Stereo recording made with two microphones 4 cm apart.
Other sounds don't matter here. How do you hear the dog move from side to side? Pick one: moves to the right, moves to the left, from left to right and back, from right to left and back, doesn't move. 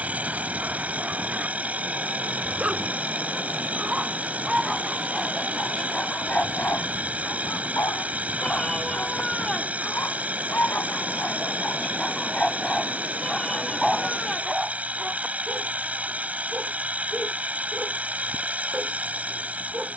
from right to left and back.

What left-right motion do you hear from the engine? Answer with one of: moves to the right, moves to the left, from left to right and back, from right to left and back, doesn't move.
doesn't move.